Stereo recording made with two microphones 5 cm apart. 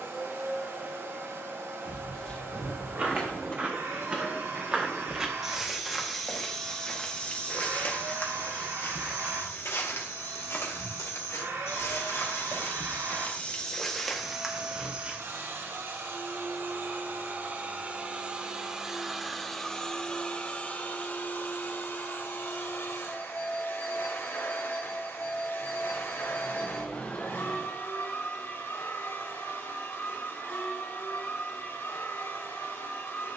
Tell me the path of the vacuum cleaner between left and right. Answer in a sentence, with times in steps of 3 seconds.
In this clip you hear the vacuum cleaner on the right from 0 s, in the centre from 18 s and on the left from 21 s.